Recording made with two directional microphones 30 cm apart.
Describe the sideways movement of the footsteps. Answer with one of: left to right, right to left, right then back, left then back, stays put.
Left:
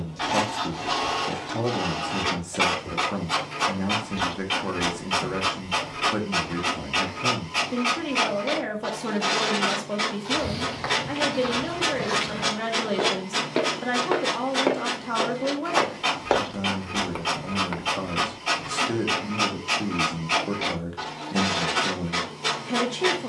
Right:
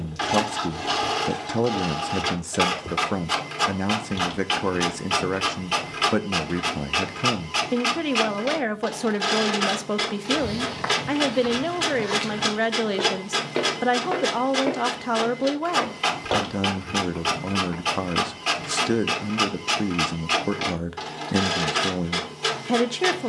right to left.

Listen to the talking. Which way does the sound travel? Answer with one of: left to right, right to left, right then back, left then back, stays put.
stays put.